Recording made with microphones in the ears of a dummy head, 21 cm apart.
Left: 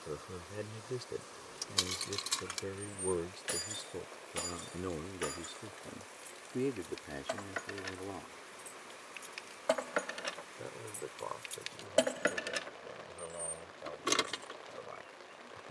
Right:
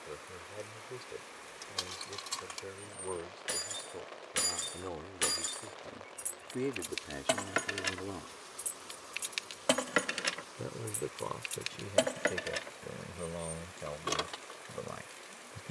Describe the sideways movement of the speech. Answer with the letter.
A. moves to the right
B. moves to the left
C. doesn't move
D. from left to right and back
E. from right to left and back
A.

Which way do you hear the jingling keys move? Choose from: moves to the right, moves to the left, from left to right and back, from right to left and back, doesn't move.
from left to right and back.